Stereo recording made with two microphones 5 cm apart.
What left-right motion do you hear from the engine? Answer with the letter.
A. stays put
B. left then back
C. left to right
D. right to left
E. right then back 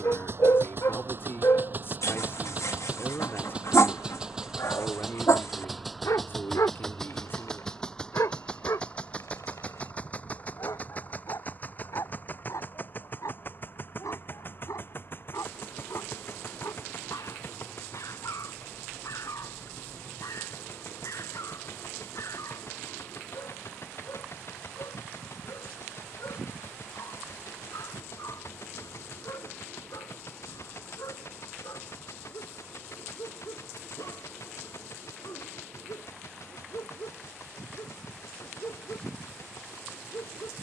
D.